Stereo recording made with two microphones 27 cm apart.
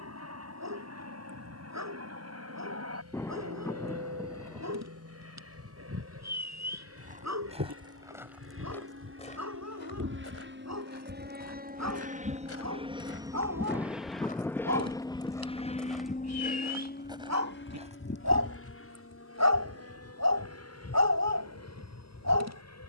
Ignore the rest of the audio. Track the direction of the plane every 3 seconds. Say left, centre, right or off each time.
right, right, right, right, centre, left, left, left.